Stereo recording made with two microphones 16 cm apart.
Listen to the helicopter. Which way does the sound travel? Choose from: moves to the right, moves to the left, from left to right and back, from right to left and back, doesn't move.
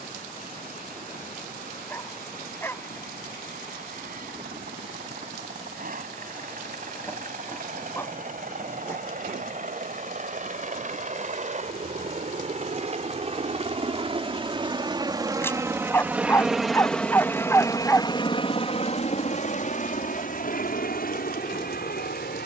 moves to the left.